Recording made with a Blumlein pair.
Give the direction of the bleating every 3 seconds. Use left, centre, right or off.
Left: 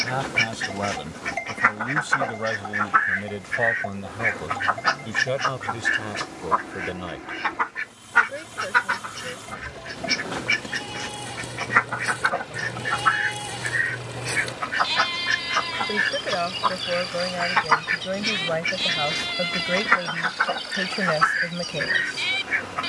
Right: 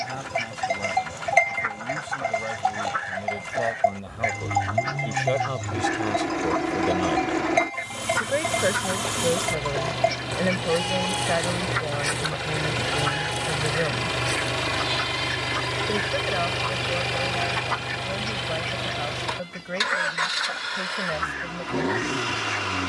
right, right, right, right, centre, left, left, left.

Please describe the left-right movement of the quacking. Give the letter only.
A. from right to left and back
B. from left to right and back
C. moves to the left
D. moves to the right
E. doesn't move
E.